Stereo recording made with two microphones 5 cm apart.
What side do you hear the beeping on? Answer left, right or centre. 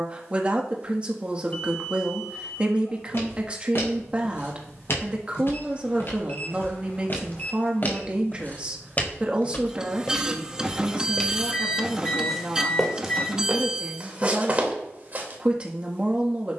left.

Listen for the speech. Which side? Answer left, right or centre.
right.